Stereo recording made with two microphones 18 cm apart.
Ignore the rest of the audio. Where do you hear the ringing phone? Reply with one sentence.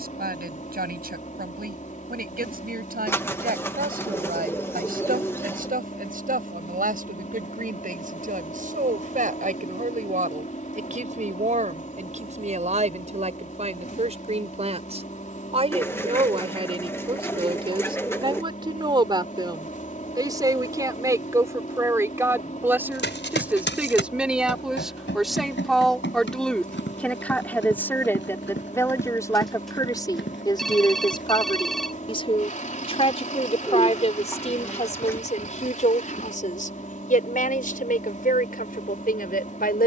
You can hear the ringing phone in the centre.